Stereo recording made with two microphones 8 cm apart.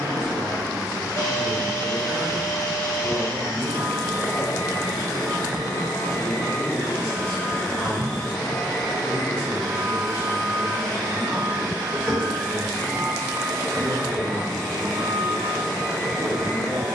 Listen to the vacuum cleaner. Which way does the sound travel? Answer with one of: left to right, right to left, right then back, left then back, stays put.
left to right.